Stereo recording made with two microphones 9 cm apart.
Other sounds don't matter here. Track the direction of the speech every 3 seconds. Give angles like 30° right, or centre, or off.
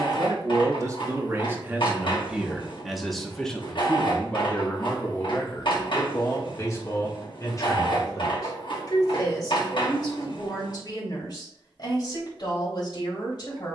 20° right, 20° left, 40° left, 50° left, 50° left.